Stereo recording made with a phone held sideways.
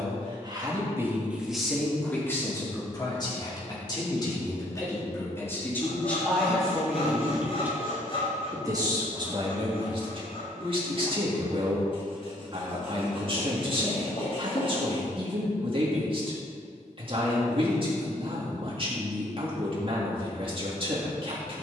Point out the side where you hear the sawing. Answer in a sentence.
In this clip you hear the sawing on the left.